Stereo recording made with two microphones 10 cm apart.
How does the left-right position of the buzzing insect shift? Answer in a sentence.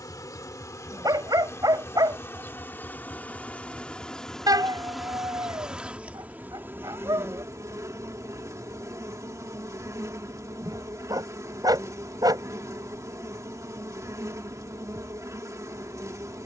You can hear the buzzing insect go from the left side to the right.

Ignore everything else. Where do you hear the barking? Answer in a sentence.
In this clip you hear the barking on the right.